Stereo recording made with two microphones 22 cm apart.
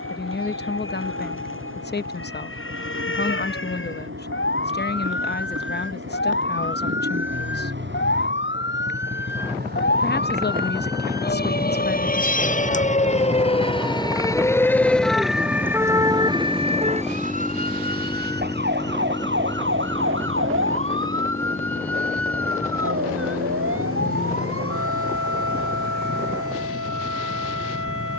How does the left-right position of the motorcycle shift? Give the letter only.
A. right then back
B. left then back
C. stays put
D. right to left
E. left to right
D.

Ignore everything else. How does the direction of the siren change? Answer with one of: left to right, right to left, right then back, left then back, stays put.
left to right.